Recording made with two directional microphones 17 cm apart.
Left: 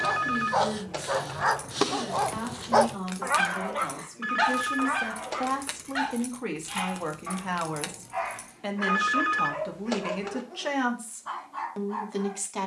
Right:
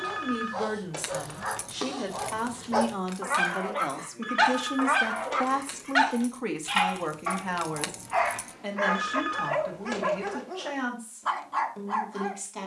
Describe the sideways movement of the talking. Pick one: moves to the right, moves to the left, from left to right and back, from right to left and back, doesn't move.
moves to the left.